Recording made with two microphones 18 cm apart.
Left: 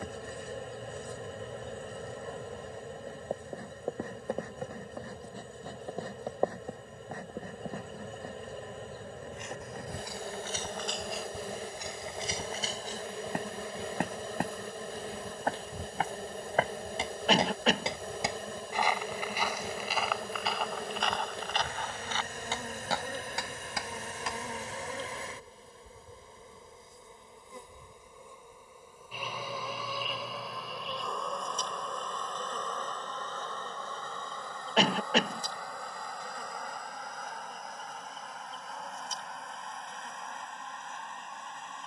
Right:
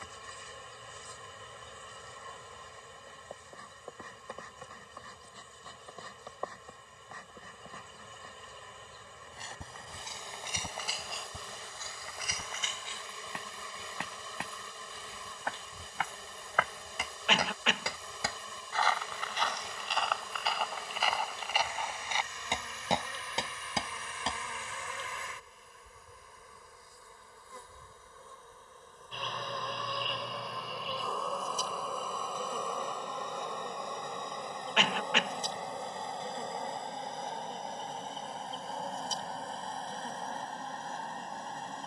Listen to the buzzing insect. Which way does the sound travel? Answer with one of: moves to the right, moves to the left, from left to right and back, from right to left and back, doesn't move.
moves to the right.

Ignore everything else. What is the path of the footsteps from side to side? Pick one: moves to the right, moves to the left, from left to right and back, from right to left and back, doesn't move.
from right to left and back.